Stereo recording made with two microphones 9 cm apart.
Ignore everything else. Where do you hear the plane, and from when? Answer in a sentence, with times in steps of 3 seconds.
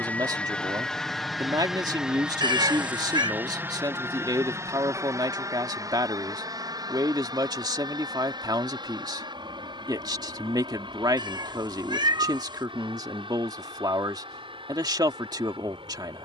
In this clip you hear the plane in the centre from 0 s and on the right from 3 s.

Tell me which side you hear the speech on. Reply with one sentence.
You can hear the speech on the right.